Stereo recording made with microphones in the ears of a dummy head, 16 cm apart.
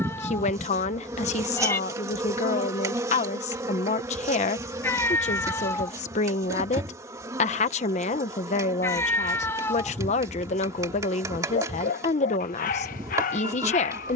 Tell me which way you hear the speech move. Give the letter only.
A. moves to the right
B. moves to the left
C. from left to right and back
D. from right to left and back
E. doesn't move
E.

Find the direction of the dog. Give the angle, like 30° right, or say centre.
50° left.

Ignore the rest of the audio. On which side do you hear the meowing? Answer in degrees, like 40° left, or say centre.
10° left.